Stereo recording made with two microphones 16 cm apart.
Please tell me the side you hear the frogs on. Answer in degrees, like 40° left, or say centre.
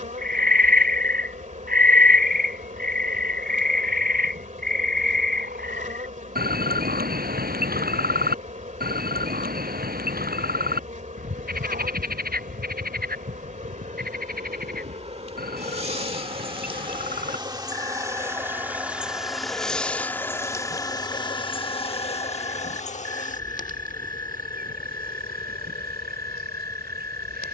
70° right.